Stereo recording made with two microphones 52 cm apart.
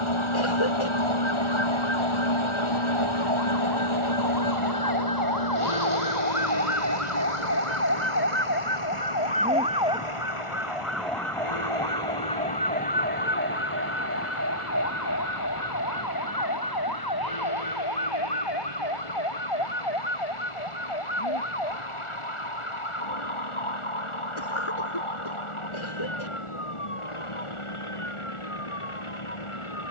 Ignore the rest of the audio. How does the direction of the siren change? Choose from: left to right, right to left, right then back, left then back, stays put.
right to left.